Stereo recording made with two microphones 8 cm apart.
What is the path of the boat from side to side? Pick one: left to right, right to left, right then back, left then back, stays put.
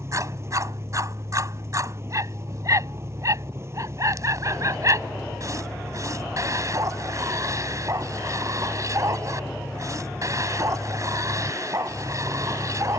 stays put.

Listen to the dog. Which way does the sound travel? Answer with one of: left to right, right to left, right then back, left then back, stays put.
stays put.